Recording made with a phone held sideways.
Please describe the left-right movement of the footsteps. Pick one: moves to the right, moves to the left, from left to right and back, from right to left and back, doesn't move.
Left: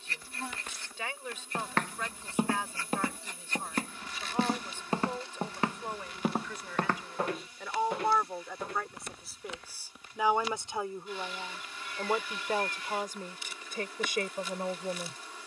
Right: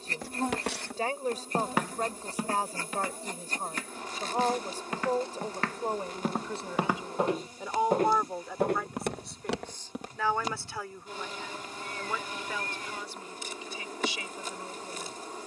from right to left and back.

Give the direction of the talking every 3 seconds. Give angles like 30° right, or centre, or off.
40° right, 40° right, 20° right, 20° left, 40° left.